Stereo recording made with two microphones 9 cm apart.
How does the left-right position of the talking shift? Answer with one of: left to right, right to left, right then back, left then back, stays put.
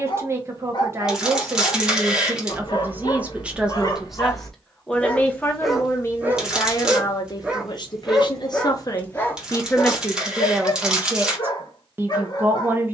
left then back.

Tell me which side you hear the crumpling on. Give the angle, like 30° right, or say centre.
10° right.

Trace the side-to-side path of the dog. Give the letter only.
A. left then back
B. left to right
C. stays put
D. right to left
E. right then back
E.